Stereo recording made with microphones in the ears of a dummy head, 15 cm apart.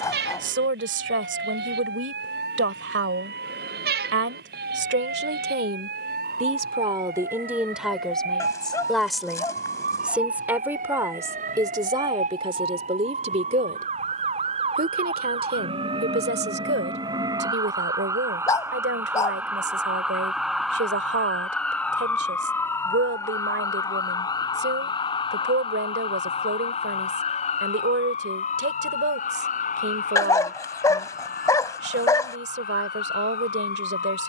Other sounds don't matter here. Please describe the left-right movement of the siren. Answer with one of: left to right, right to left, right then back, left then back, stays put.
right to left.